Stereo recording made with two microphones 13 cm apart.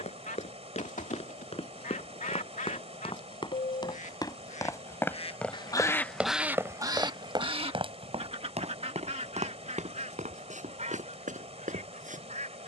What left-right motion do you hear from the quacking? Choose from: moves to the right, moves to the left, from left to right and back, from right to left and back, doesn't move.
moves to the right.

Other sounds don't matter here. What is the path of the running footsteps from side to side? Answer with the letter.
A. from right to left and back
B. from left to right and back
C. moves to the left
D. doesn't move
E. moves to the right
E.